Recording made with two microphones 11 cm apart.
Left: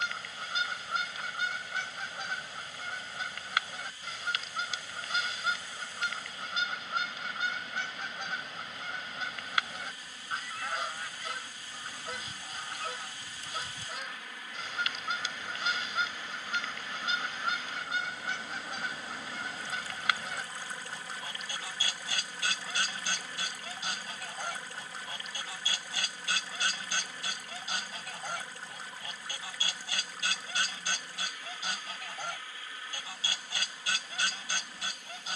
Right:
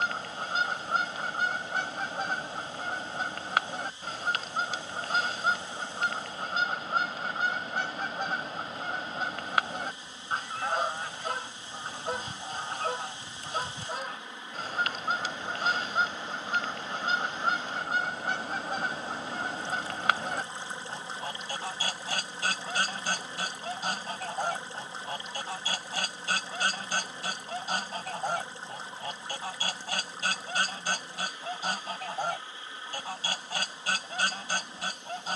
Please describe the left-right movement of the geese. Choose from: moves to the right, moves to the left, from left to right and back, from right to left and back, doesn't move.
doesn't move.